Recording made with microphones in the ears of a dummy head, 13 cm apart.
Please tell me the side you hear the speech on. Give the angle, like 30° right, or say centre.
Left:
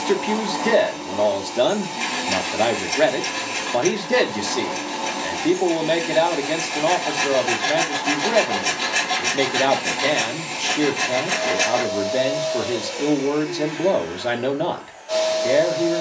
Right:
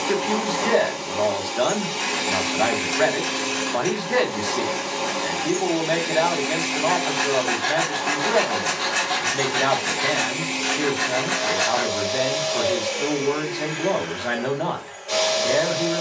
30° left.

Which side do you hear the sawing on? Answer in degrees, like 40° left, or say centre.
20° left.